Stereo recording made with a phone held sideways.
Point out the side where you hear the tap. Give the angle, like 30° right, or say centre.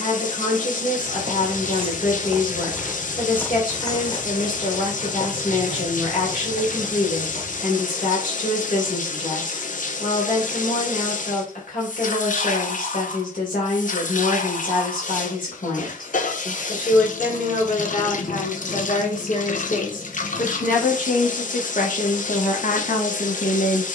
70° left.